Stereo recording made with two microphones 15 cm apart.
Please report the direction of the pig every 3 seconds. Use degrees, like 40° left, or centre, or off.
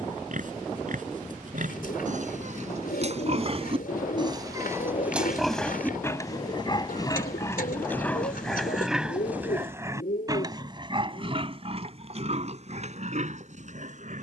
60° right, 20° right, 20° left, 30° right, 50° right.